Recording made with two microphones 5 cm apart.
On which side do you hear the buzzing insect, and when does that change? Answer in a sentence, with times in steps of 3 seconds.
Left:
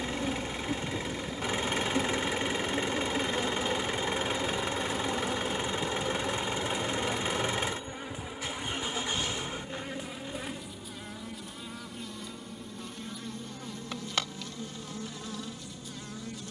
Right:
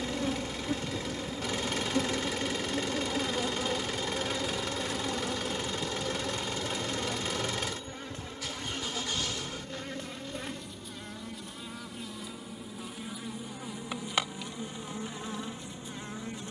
You can hear the buzzing insect on the right from 0 s, in the centre from 3 s and on the right from 15 s.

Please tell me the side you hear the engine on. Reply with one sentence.
You can hear the engine on the left.